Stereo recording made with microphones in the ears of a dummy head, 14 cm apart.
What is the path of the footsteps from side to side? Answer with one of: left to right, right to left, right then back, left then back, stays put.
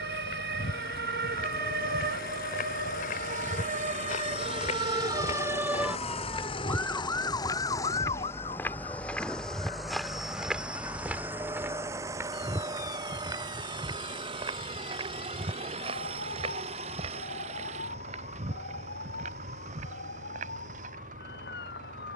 left to right.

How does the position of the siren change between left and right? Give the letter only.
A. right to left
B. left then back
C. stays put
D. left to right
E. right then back
A.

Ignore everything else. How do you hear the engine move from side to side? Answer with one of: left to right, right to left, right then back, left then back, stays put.
left to right.